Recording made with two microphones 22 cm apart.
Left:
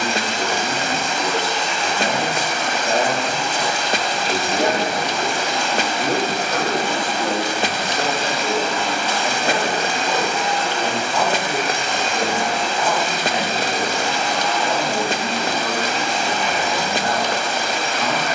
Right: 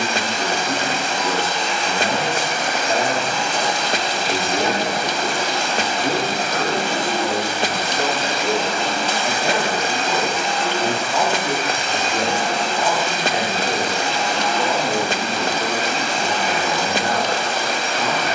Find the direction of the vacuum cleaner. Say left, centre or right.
right.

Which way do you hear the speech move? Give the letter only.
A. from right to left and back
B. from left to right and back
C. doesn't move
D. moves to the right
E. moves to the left
D.